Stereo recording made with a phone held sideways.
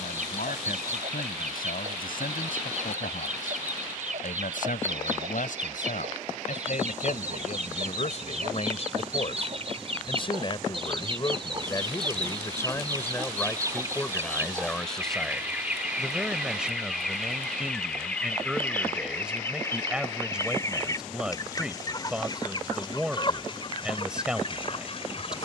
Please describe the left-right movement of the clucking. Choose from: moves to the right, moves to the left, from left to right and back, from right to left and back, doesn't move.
moves to the left.